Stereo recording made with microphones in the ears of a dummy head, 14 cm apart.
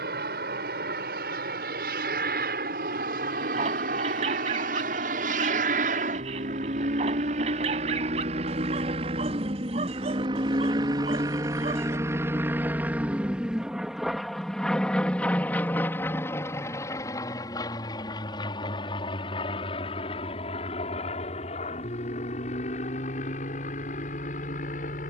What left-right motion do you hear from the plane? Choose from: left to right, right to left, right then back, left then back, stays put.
right to left.